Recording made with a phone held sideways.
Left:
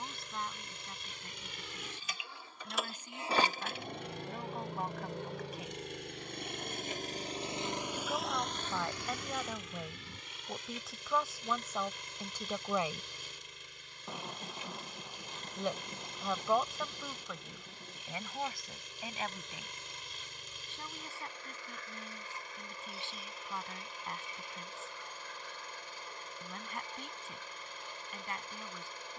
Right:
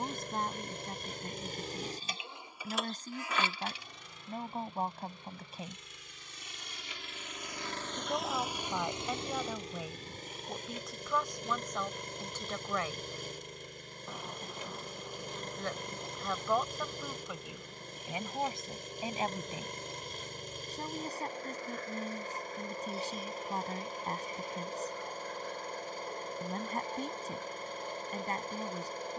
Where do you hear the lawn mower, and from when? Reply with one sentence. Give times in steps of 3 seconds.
You can hear the lawn mower on the right from 0 s, on the left from 3 s and on the right from 9 s.